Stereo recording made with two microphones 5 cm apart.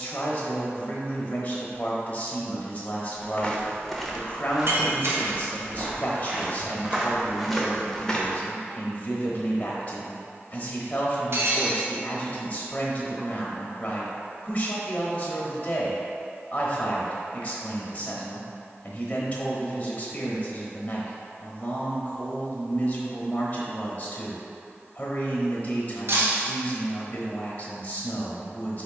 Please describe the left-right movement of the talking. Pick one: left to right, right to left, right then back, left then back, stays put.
stays put.